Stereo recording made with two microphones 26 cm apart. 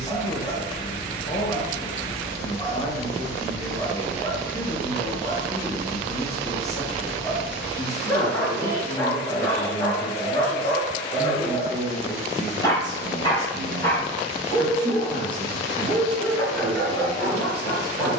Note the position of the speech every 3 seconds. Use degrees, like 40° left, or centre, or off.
30° left, 30° left, 30° left, 20° left, 10° right, 40° right.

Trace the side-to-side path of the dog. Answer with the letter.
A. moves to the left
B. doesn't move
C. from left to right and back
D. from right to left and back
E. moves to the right
B.